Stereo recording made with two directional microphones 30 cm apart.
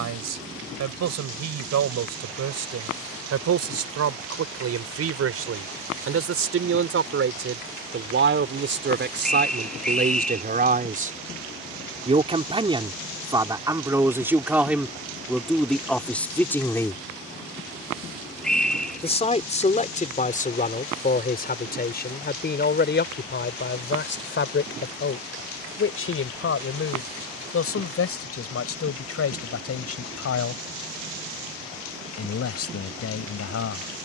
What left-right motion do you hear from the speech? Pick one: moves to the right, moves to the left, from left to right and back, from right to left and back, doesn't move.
moves to the left.